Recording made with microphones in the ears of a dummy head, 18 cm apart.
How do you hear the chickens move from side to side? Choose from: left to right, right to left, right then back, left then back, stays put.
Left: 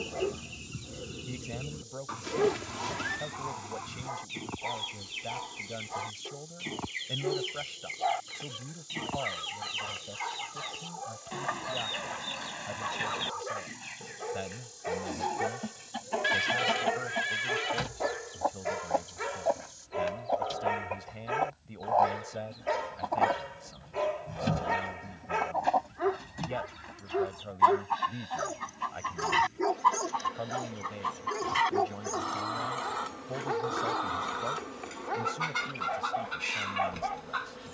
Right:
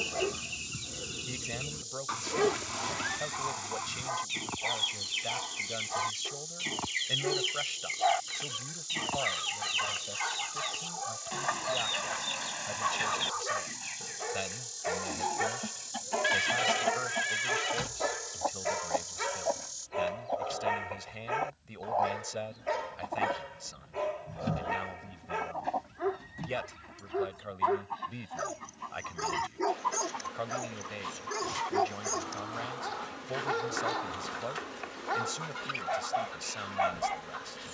right to left.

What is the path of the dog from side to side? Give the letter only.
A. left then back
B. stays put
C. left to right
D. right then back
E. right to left
A.